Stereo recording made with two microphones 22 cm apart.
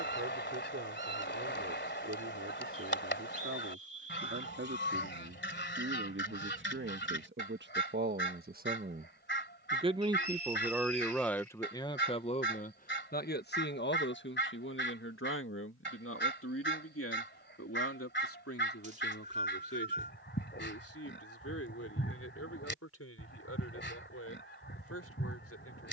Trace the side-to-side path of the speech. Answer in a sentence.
You can hear the speech travel towards the left.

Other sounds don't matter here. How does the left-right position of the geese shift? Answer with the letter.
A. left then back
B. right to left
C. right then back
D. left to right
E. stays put
E.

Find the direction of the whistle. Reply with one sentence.
In this clip you hear the whistle on the right.